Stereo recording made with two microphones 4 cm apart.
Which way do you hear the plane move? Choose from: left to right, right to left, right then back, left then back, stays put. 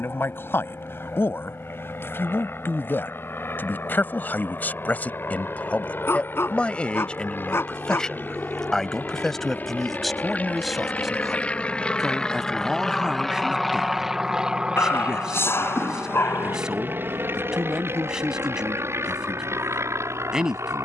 left to right.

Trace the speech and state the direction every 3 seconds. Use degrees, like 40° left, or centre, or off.
60° left, 40° left, 20° left, centre, 10° right, 10° right, 10° right.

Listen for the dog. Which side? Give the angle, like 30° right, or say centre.
60° left.